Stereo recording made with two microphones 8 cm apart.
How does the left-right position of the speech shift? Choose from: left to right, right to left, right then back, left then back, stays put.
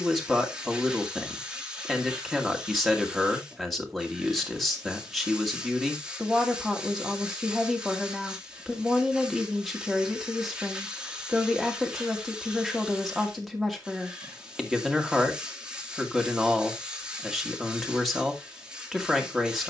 stays put.